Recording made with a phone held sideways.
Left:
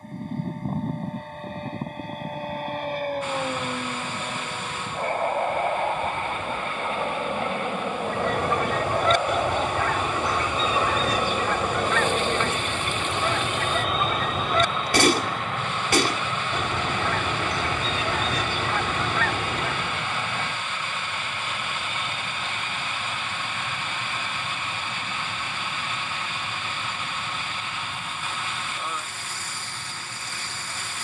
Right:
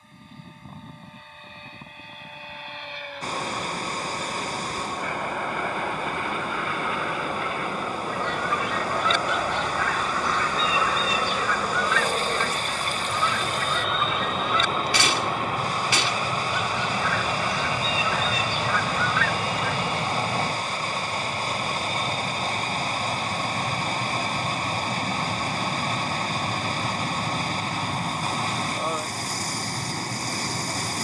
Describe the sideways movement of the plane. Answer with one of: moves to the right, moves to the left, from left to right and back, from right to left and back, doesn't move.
moves to the right.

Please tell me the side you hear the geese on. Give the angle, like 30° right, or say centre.
50° left.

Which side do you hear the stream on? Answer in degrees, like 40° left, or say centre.
40° right.